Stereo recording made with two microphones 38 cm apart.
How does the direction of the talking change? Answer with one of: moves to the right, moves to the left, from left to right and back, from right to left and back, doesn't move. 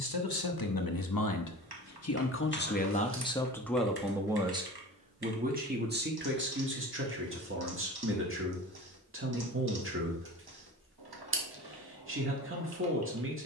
moves to the right.